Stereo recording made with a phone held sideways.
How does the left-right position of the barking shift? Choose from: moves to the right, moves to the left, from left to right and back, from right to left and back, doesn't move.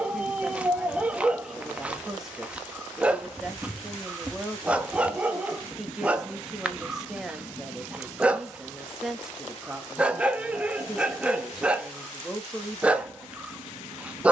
doesn't move.